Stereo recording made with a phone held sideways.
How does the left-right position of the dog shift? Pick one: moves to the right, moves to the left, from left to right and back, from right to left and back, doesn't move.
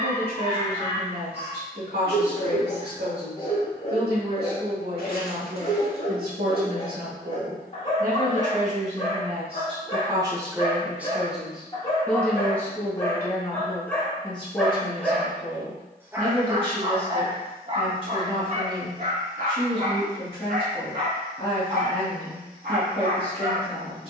moves to the right.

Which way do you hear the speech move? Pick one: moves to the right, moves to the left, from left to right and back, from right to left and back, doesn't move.
moves to the left.